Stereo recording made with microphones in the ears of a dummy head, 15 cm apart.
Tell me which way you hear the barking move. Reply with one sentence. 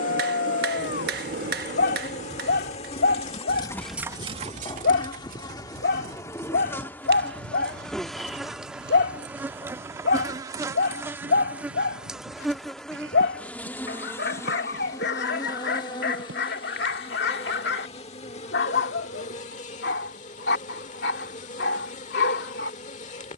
In this clip you hear the barking stay in one place.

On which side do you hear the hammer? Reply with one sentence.
You can hear the hammer on the right.